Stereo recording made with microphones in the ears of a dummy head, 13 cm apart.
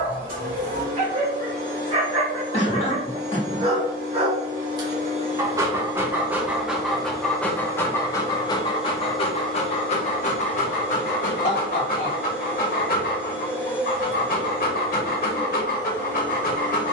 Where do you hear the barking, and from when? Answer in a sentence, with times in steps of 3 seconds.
In this clip you hear the barking on the right from 0 s, in the centre from 6 s and on the left from 9 s.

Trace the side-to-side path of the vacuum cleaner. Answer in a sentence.
You can hear the vacuum cleaner move to the left.